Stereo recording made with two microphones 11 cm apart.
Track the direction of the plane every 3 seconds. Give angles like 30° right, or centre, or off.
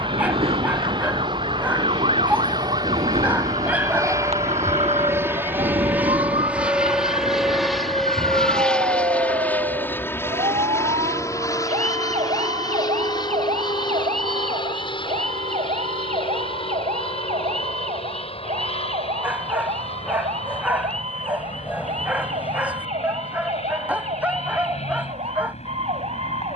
50° right, 30° right, centre, 20° left, 40° left, 50° left, 60° left, 60° left, 70° left.